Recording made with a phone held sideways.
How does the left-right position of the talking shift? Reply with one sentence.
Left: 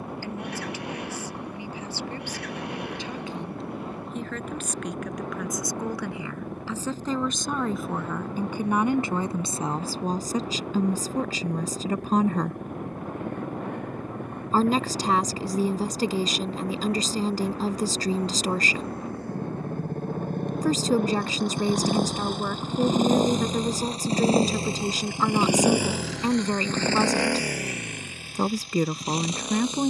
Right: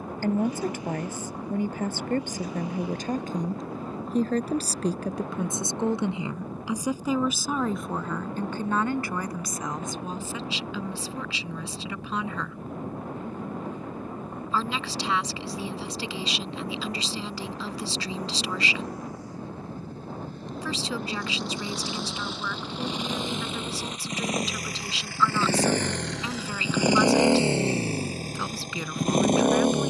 You can hear the talking travel towards the left.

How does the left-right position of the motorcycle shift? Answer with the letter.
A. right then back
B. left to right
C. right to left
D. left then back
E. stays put
B.